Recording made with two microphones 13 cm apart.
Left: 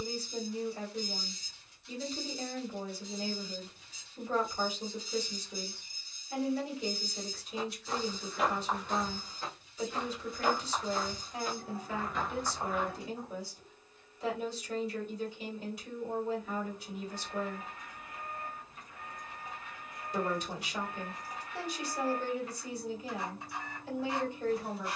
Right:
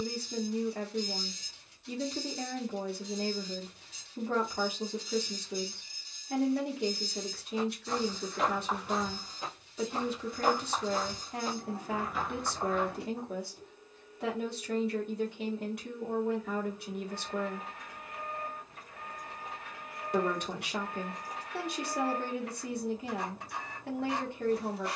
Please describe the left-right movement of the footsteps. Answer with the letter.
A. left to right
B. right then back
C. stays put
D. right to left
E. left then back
B.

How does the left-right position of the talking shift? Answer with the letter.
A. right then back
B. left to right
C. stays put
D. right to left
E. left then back
C.